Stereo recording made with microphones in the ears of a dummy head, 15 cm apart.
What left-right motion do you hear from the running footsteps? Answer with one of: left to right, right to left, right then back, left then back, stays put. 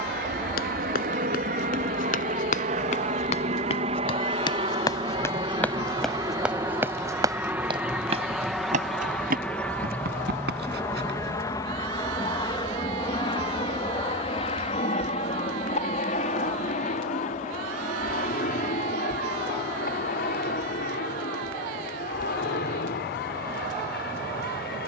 left to right.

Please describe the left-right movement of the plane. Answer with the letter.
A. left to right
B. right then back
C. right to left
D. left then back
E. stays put
C.